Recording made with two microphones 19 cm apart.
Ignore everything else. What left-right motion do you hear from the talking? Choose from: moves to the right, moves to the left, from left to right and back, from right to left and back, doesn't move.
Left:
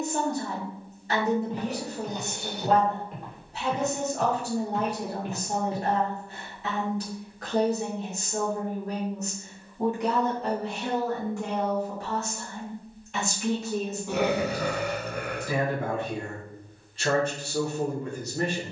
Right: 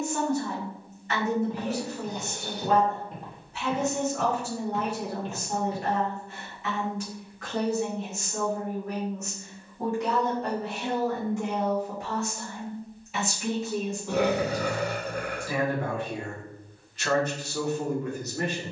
from left to right and back.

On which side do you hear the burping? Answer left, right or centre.
right.